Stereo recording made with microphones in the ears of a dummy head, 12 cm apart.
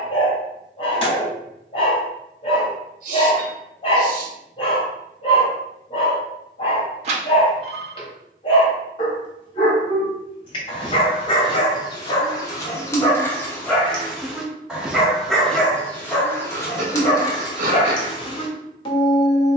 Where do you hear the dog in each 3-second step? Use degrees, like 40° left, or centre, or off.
40° left, 40° left, 40° left, 40° left, 10° left, 20° left, 40° left.